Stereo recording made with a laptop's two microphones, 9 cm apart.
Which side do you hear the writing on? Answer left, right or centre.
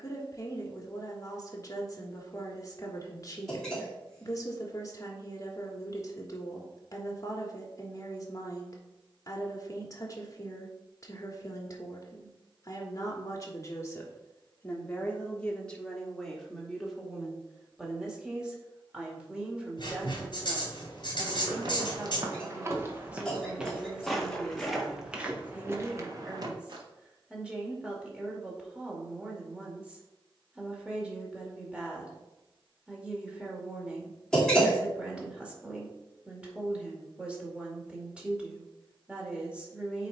left.